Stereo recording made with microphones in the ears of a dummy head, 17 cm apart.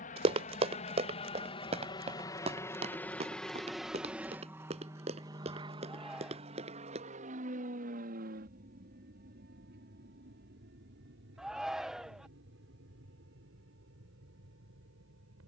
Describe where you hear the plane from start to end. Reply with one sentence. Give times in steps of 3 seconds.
In this clip you hear the plane on the left from 0 s, in the centre from 3 s and on the right from 6 s.